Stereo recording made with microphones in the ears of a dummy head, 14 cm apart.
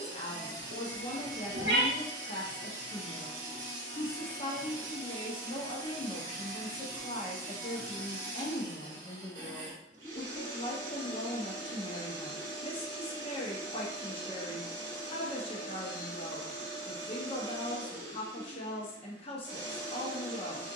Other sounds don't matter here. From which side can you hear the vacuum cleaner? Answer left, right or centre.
right.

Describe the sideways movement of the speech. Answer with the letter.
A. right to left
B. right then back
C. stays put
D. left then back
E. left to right
C.